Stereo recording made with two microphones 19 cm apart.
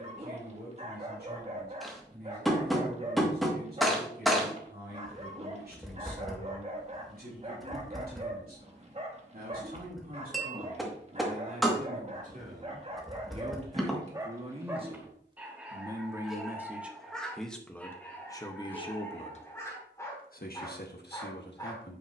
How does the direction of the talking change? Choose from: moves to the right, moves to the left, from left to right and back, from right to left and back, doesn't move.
moves to the left.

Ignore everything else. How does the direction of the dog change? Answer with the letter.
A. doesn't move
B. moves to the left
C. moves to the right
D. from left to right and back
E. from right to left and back
B.